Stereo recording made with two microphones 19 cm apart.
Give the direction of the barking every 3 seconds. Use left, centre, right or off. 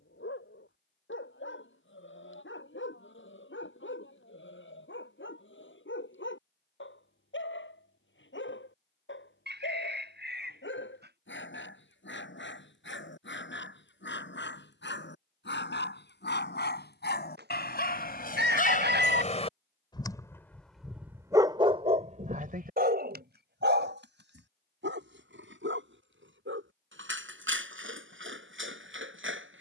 left, left, left, left, left, left, left, right, right, right.